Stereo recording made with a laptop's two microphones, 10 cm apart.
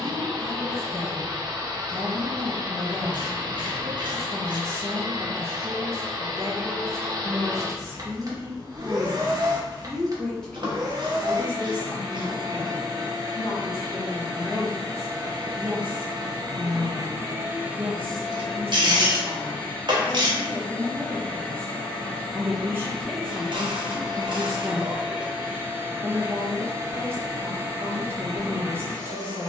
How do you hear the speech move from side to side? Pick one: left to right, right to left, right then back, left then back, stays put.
left then back.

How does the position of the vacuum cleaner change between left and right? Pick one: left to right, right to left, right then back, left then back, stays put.
left then back.